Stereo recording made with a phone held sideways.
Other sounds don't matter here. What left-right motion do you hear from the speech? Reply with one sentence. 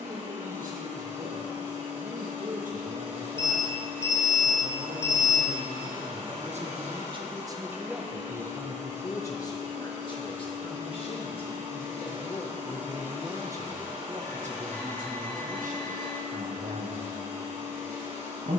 You can hear the speech move from right to left and back again.